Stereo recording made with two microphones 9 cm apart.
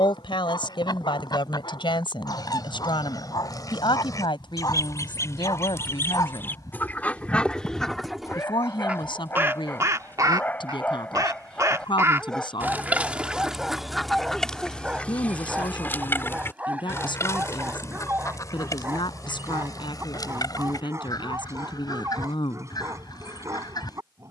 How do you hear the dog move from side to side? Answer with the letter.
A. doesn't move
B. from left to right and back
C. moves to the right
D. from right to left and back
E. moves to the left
C.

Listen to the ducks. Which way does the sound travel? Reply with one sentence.
You can hear the ducks go right and come back.